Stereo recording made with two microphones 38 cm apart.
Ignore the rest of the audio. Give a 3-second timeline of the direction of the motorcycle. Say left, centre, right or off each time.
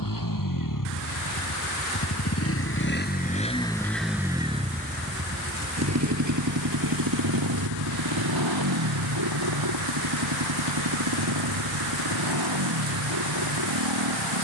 left, centre, right, right, right.